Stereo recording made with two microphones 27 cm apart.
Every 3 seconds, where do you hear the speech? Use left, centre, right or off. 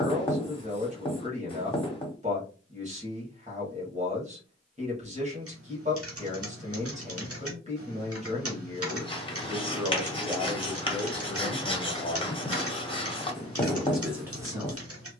right, right, right, centre, centre.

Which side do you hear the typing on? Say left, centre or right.
right.